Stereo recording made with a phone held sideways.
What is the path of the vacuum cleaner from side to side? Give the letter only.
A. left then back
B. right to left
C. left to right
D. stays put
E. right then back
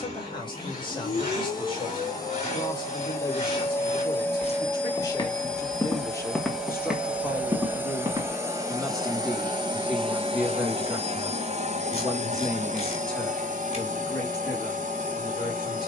C.